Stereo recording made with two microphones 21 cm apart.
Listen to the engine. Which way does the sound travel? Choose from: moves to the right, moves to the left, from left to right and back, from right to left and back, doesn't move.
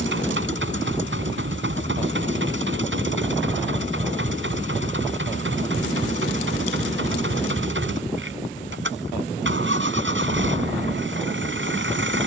doesn't move.